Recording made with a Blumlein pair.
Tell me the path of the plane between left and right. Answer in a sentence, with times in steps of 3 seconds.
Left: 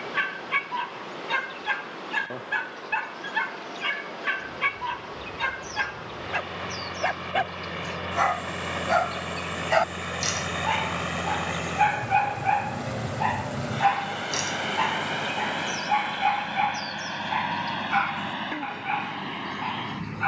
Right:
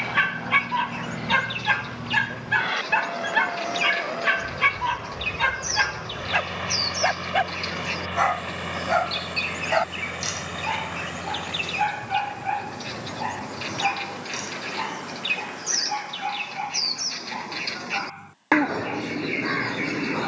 In this clip you hear the plane on the right from 0 s, in the centre from 6 s and on the left from 12 s.